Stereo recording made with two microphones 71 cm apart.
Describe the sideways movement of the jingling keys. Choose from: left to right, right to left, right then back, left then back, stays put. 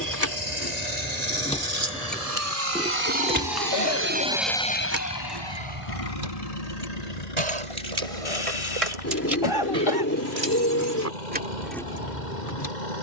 right then back.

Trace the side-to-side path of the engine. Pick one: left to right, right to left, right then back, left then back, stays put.
right to left.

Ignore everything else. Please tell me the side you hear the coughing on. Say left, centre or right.
left.